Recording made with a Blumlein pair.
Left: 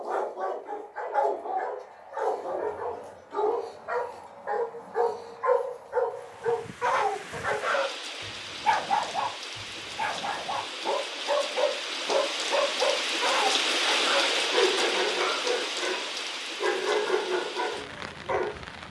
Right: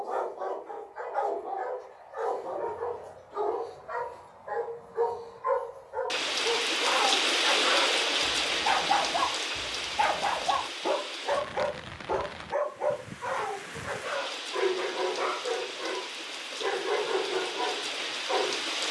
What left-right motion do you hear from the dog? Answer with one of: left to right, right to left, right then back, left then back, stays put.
right then back.